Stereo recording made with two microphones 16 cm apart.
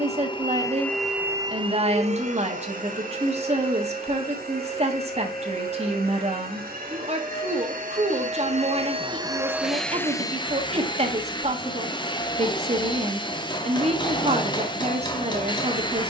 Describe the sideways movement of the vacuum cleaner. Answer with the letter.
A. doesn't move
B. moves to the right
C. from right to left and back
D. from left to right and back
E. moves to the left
D.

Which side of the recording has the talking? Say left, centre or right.
right.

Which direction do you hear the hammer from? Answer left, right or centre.
left.